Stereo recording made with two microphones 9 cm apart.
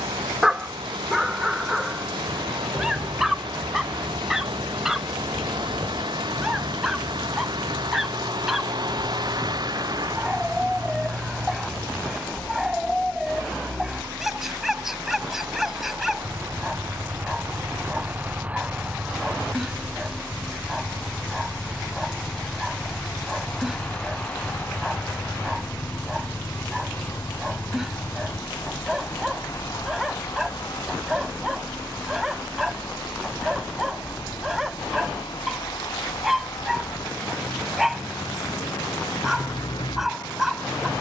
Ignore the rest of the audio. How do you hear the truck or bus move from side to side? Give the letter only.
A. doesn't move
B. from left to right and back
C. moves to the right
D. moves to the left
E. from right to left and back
D.